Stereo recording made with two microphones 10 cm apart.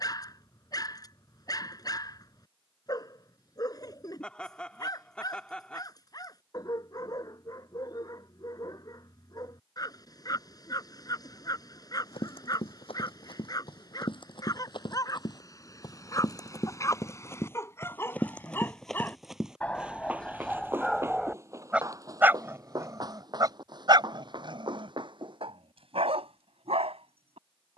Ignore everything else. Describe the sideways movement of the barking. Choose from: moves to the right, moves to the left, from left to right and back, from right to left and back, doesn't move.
moves to the right.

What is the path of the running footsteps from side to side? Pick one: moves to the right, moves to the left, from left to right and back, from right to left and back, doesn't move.
moves to the right.